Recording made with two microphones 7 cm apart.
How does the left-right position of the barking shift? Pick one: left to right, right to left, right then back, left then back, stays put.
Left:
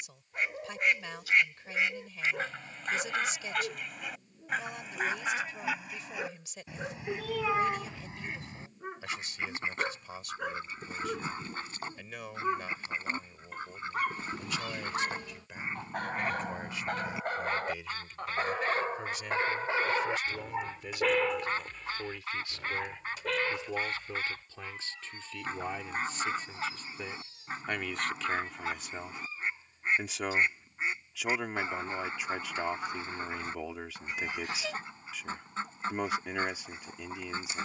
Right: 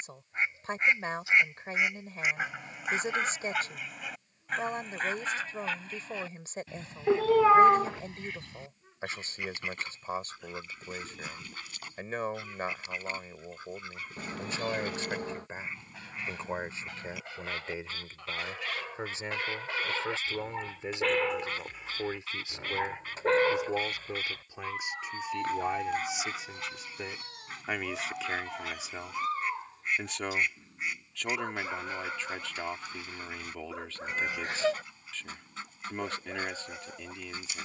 left to right.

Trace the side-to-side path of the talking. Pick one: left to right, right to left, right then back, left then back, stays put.
right to left.